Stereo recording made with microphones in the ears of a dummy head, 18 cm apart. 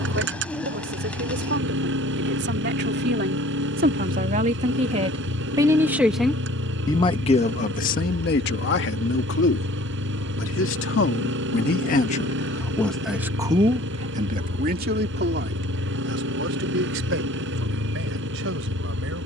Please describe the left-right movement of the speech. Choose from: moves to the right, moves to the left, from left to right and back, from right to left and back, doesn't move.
from right to left and back.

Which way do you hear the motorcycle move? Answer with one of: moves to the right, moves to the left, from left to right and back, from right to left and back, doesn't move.
doesn't move.